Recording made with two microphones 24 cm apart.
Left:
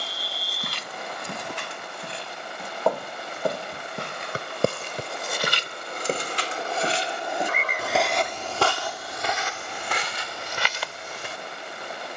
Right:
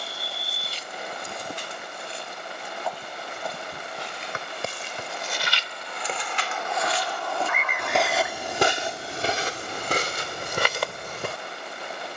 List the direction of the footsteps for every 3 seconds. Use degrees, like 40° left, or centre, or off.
70° left, 60° left, 10° left, 50° right.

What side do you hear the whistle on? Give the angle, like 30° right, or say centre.
40° left.